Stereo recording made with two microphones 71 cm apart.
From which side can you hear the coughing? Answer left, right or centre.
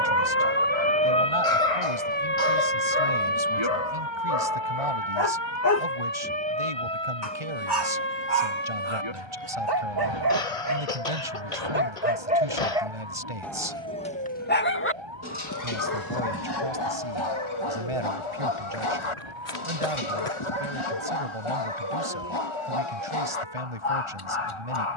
left.